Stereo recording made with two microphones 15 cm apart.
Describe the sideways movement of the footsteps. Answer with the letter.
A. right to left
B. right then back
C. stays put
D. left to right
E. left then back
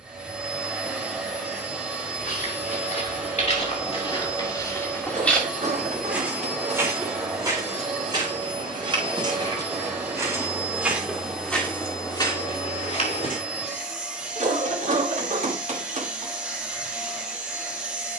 B.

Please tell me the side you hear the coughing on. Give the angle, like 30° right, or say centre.
50° right.